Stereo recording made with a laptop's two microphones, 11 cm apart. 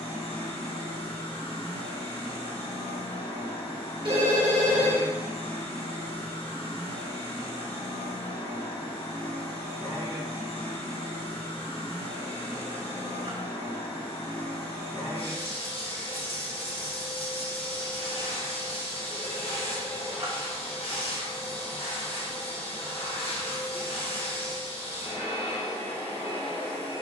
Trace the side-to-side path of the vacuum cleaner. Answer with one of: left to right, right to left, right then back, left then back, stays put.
stays put.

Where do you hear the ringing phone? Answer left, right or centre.
right.